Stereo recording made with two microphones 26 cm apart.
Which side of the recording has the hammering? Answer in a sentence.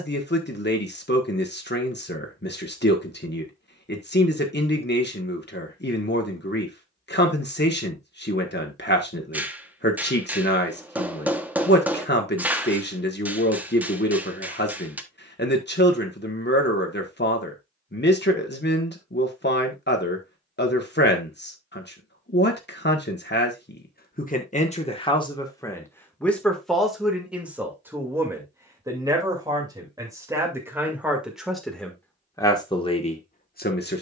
You can hear the hammering in the centre.